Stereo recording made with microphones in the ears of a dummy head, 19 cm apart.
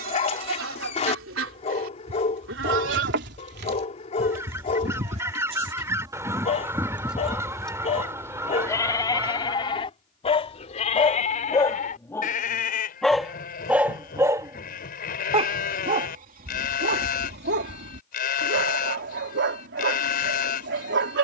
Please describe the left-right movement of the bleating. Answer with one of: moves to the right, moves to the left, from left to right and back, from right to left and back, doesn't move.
moves to the left.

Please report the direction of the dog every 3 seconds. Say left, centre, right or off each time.
left, left, left, left, centre, right, right.